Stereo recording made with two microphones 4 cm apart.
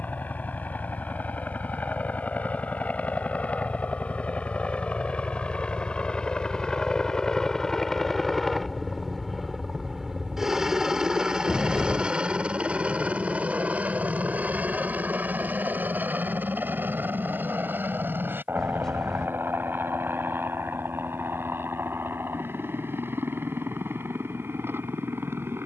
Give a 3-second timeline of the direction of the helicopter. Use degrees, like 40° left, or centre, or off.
50° left, 30° left, 10° left, 10° right, 40° right, 50° right, 60° right, 70° right, 70° right.